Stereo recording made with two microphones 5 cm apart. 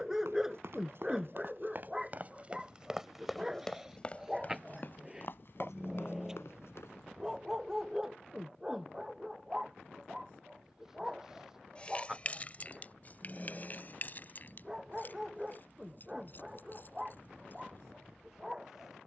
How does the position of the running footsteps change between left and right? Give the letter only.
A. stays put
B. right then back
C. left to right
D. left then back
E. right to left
E.